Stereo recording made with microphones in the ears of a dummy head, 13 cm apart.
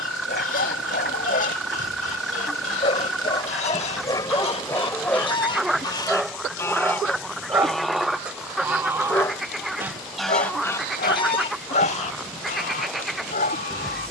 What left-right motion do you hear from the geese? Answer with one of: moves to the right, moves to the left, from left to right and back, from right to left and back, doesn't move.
from left to right and back.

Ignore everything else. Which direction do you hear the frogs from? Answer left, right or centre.
centre.